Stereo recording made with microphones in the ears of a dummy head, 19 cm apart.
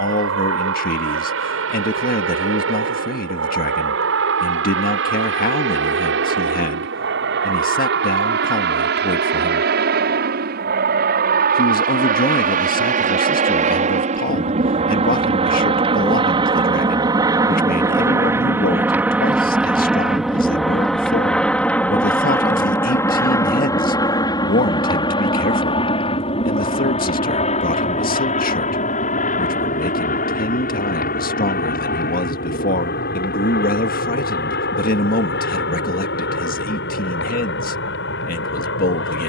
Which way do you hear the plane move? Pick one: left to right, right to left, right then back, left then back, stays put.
right to left.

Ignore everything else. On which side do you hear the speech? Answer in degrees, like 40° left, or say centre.
40° left.